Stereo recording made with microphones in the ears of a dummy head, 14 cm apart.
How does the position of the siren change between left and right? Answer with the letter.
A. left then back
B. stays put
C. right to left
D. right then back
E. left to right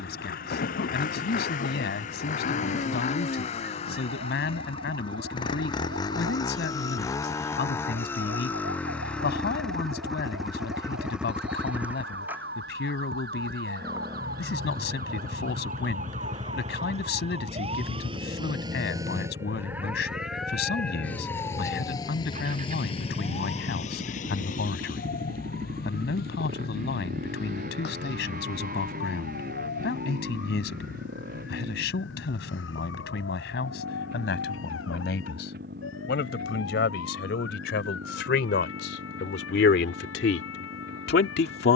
C.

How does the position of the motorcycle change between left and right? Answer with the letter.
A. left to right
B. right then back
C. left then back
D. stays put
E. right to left
A.